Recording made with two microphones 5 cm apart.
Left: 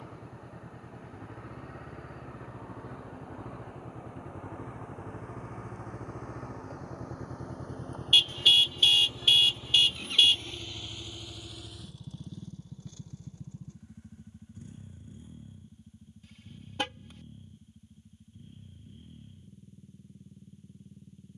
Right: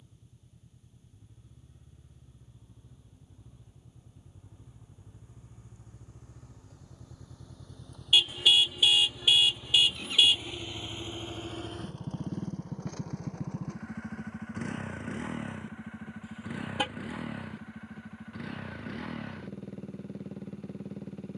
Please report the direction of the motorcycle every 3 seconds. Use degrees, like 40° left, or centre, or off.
70° left, 70° left, 50° left, 10° right, 60° right, 70° right, 80° right.